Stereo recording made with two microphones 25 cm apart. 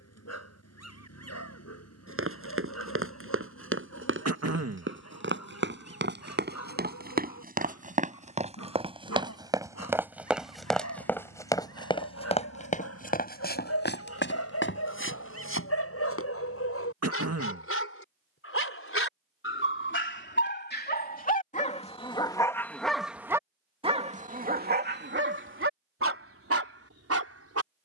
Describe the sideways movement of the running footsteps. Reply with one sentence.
In this clip you hear the running footsteps move to the left.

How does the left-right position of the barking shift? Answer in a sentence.
You can hear the barking travel towards the right.